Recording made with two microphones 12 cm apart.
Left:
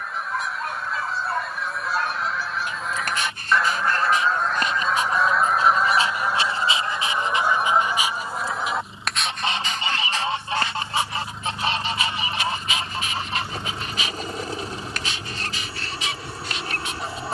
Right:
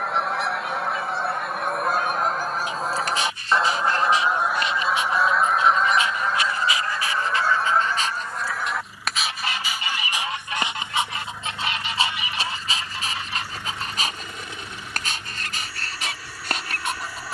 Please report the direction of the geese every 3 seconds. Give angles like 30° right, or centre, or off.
60° right, 10° right, 20° left, 30° left, 40° left, 40° left.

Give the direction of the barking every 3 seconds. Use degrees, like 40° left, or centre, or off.
60° left, 50° left, 20° left, 20° right, 40° right, 50° right.